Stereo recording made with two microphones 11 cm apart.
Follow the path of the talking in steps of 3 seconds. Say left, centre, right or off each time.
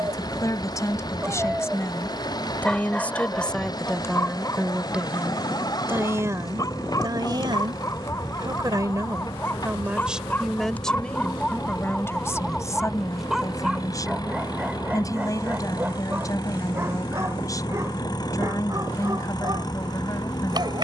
left, centre, right, centre, left, left, left.